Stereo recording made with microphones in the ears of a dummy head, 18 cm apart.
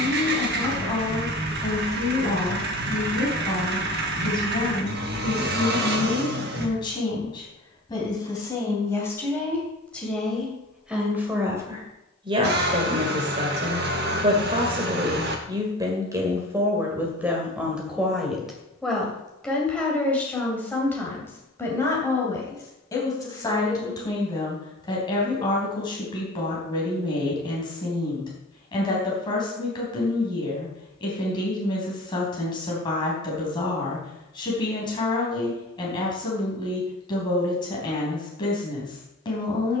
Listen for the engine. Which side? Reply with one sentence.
You can hear the engine on the right.